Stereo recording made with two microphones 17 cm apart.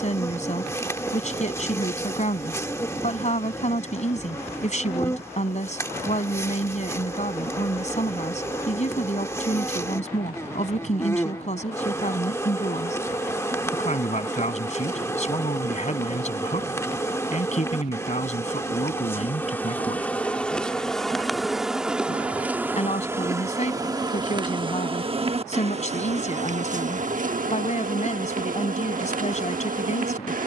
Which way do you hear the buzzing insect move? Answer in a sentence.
You can hear the buzzing insect move from left to right.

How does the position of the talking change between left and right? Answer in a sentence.
In this clip you hear the talking stay put.